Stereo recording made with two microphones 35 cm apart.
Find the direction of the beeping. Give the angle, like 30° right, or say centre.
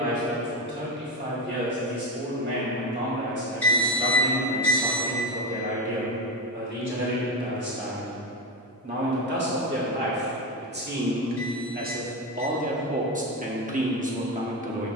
centre.